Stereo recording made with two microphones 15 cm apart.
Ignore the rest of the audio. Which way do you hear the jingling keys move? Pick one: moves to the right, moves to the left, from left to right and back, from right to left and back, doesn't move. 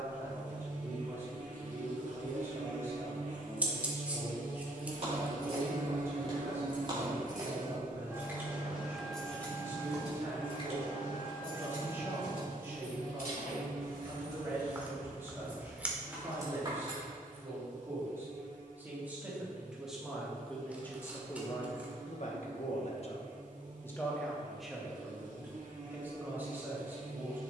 from right to left and back.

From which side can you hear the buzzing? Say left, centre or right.
right.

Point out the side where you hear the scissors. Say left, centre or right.
centre.